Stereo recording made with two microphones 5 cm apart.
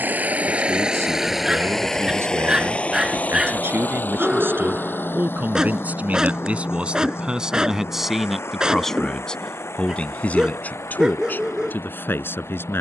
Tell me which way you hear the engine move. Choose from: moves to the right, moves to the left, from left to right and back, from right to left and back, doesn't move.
moves to the left.